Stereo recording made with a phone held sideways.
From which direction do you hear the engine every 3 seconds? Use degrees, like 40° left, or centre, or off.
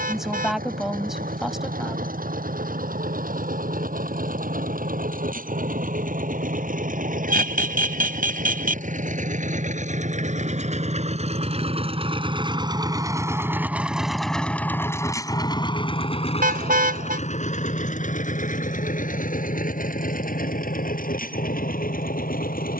80° right, 70° right, 70° right, 50° right, 10° right, 40° left, 70° left, 80° left.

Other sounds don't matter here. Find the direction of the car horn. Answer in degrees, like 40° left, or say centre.
80° right.